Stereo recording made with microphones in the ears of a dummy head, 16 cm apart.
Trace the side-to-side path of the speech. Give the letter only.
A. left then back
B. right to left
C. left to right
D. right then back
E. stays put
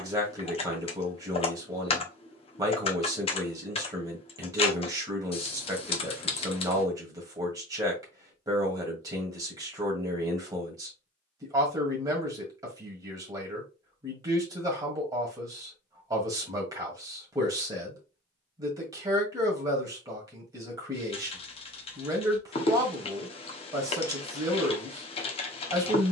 E.